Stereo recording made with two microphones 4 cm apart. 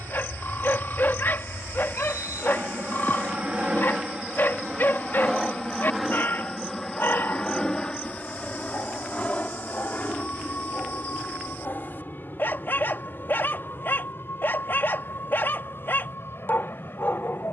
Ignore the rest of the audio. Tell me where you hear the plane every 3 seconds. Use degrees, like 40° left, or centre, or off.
40° right, 10° right, 20° left, 40° left, 50° left, 60° left.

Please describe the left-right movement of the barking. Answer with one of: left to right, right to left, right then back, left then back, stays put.
stays put.